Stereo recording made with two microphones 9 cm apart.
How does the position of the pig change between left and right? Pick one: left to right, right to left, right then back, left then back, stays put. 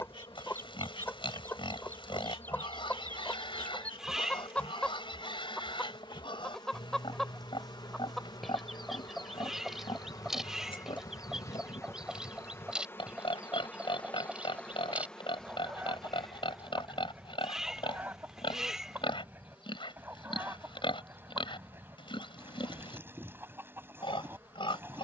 stays put.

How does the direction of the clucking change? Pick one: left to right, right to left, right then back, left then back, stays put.
left to right.